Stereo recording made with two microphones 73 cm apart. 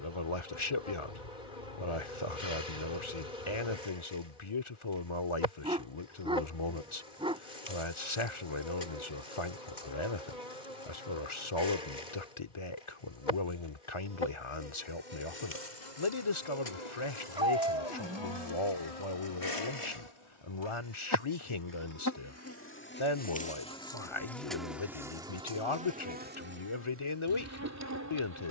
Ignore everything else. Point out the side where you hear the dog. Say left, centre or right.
centre.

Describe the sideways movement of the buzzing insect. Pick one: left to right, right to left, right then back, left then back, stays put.
left to right.